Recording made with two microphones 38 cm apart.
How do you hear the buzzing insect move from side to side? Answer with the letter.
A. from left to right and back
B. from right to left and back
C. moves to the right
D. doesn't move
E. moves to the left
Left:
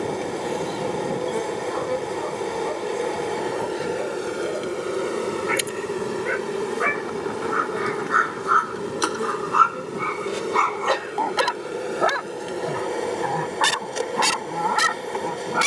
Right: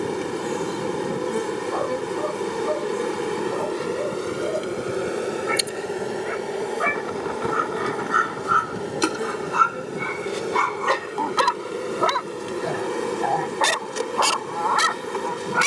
B.